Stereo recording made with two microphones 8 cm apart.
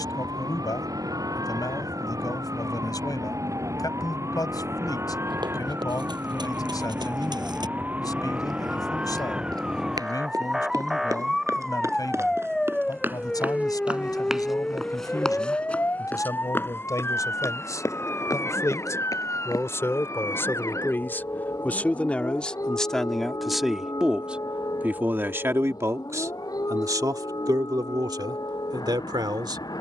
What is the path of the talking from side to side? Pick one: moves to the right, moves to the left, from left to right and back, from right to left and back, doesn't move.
moves to the right.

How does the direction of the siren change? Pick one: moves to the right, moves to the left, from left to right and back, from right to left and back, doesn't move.
moves to the left.